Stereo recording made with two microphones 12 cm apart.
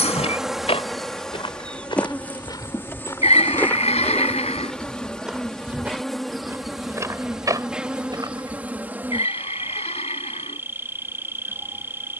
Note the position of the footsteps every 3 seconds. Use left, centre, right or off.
left, centre, right, off.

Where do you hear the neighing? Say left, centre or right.
left.